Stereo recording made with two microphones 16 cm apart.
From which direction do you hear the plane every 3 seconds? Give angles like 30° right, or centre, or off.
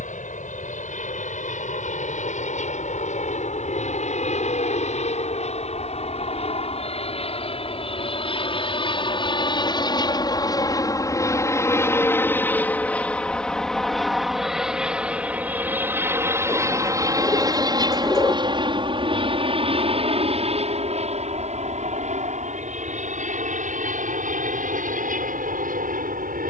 60° left, 50° left, 40° left, 30° left, centre, 20° right, 30° right, 50° right, 60° right.